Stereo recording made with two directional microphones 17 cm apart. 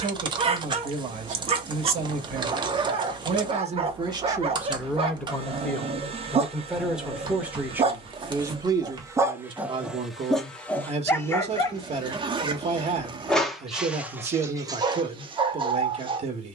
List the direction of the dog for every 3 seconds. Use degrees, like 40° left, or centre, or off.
30° right, 30° right, 30° right, centre, 10° right, 30° right.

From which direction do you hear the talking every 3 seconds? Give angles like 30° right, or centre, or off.
50° right, 10° right, 10° right, 30° right, 40° right, 40° right.